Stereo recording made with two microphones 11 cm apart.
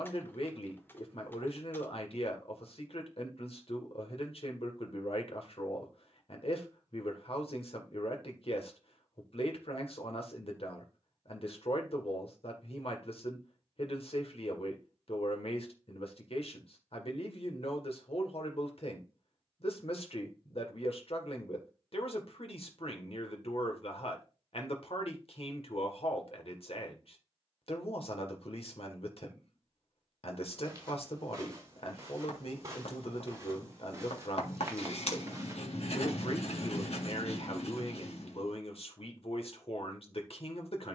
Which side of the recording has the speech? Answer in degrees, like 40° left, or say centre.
60° left.